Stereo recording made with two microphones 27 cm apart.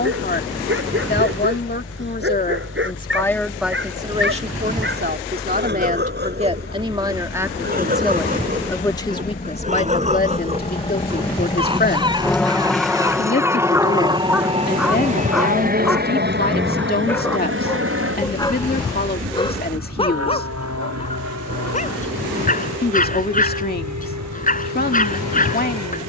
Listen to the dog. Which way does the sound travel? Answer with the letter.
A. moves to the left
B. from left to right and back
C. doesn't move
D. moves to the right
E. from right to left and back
A.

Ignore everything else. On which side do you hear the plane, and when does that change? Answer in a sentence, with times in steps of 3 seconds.
In this clip you hear the plane on the left from 0 s, in the centre from 12 s and on the right from 15 s.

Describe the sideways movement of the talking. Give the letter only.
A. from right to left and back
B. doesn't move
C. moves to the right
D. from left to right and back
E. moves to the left
D.